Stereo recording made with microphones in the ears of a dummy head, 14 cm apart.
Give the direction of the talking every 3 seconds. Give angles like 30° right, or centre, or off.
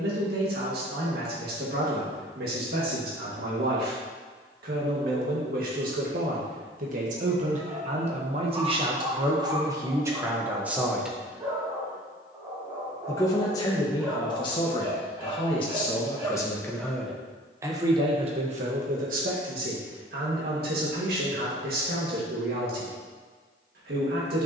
70° right, 70° right, 50° right, 20° right, 30° left, 10° left, 60° right, 70° right.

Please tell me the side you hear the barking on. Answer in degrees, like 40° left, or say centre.
20° right.